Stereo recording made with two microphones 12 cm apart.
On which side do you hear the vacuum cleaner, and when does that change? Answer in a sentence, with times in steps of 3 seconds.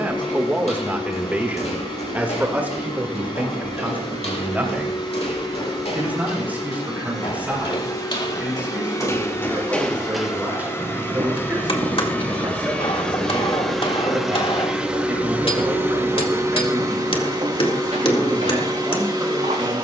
In this clip you hear the vacuum cleaner on the left from 0 s, in the centre from 12 s and on the right from 15 s.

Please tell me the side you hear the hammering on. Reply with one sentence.
In this clip you hear the hammering on the left.